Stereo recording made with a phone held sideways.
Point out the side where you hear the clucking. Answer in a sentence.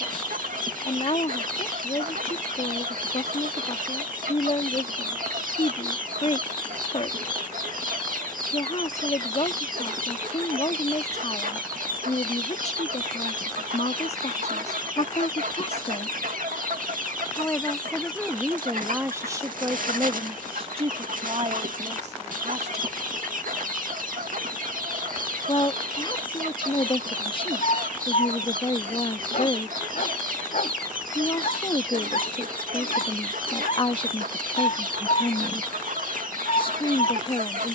You can hear the clucking on the right.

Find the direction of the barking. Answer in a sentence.
In this clip you hear the barking on the left.